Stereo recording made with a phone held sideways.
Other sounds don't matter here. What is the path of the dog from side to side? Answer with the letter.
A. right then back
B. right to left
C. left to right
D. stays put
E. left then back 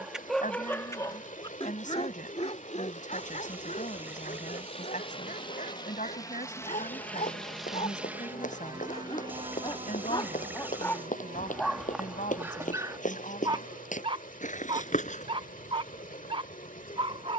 E.